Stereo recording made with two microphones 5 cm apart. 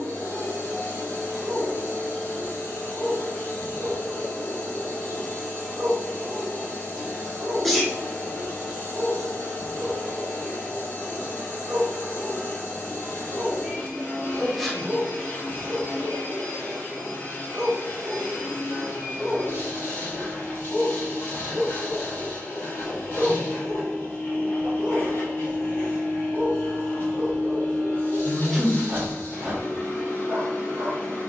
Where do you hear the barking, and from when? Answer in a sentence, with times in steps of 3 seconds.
In this clip you hear the barking on the right from 0 s, in the centre from 18 s, on the left from 21 s and on the right from 24 s.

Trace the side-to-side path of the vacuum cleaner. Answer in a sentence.
You can hear the vacuum cleaner stay put.